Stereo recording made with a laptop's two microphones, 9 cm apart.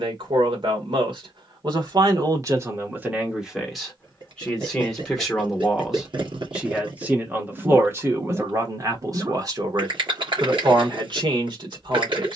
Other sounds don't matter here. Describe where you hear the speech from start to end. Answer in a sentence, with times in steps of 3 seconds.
In this clip you hear the speech on the right from 0 s, in the centre from 3 s and on the right from 6 s.